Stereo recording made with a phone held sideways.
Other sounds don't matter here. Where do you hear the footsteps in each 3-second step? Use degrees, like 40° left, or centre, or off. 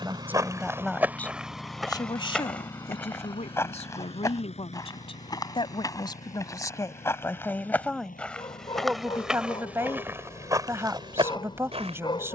10° right, 20° left, 10° left, 20° right.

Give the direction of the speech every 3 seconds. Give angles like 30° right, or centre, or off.
10° left, 40° left, 10° left, 20° right.